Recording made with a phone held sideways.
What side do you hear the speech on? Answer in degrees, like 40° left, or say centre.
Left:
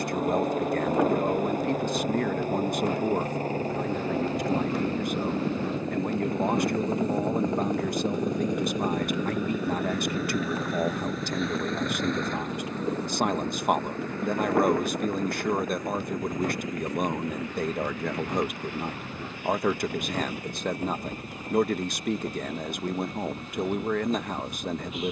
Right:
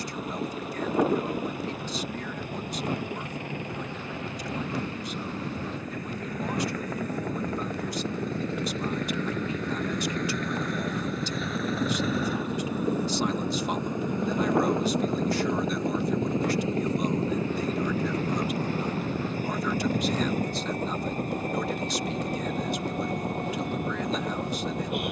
50° left.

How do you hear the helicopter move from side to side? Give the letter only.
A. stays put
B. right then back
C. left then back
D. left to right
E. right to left
D.